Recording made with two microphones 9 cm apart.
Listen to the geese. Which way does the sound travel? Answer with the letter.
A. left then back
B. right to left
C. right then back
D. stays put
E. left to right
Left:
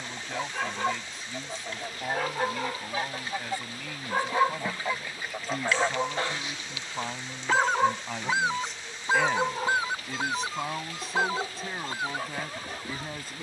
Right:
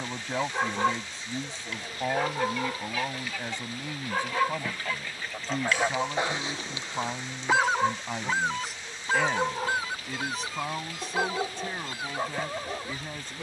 C.